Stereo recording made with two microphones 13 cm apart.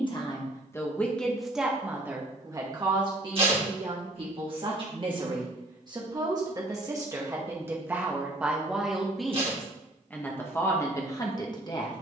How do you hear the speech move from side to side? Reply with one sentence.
You can hear the speech go right and come back.